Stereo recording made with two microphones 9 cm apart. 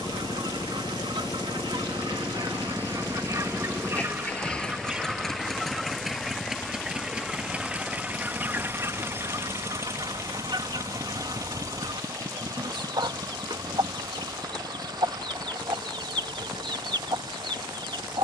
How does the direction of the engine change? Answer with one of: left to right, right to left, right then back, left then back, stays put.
left to right.